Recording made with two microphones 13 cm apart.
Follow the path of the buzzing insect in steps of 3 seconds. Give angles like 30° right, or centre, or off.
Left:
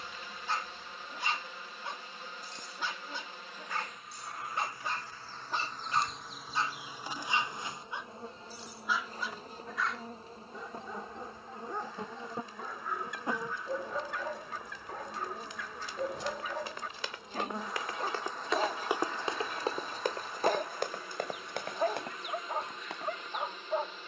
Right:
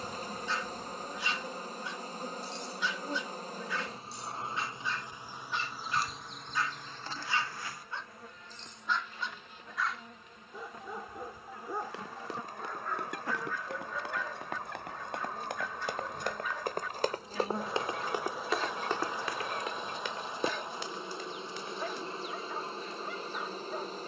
40° right, 20° right, 20° left, 30° left, 20° left, centre, 10° right, 30° right.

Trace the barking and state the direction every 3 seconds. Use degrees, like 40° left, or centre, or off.
50° left, 50° left, 20° left, centre, 20° left, 50° left, 50° left, 50° left.